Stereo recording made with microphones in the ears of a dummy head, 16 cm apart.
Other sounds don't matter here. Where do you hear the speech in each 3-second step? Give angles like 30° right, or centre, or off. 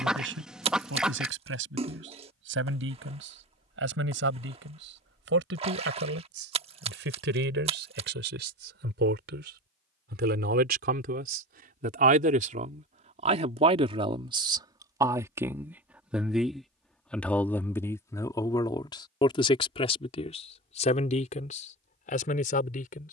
80° right, 80° right, 70° right, 60° right, 40° right, centre, 30° left, 50° left.